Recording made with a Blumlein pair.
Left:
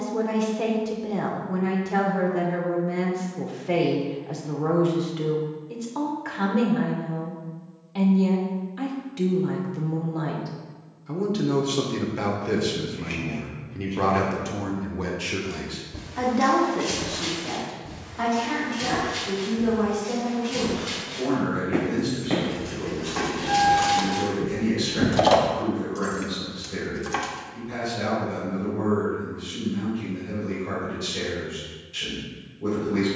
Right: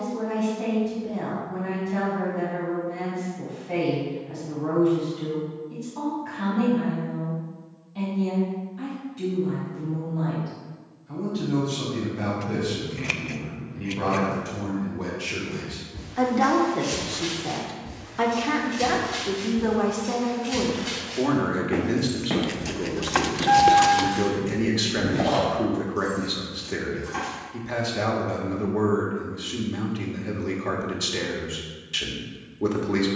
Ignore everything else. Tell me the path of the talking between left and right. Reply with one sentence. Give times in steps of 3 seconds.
In this clip you hear the talking on the left from 0 s, in the centre from 15 s and on the right from 18 s.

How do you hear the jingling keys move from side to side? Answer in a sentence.
You can hear the jingling keys go from the right side to the left.